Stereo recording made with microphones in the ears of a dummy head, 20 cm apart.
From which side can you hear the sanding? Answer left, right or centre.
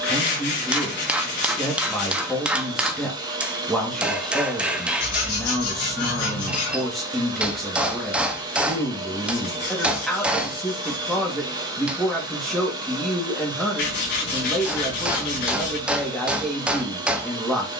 left.